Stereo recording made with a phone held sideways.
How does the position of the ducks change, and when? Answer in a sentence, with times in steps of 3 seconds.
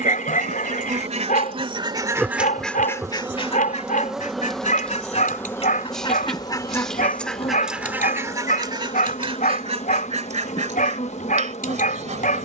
In this clip you hear the ducks on the right from 0 s, on the left from 3 s, in the centre from 6 s and on the right from 9 s.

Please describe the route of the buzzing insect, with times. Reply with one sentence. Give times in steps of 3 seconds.
In this clip you hear the buzzing insect on the right from 0 s, in the centre from 3 s and on the left from 6 s.